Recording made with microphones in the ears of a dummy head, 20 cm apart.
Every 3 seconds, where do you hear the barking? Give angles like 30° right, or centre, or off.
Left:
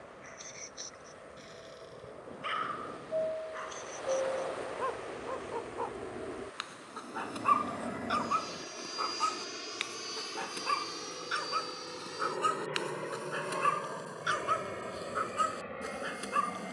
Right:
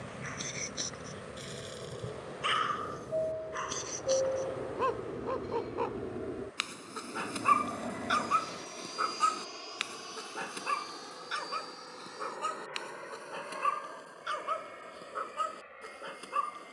60° right, 50° right, 30° right, centre, 20° left, 20° left.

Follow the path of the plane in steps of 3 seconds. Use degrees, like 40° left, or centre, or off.
50° right, 30° right, centre, 30° left, 50° left, 60° left.